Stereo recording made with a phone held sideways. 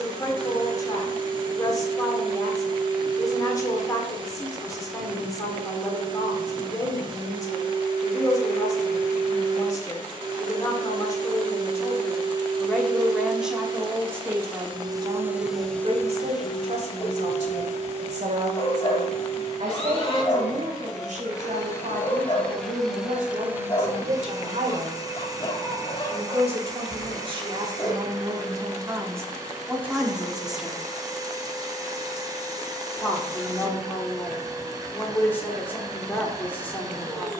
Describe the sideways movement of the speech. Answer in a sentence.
You can hear the speech move from left to right and back again.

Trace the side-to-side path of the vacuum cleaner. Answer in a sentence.
In this clip you hear the vacuum cleaner go left and come back.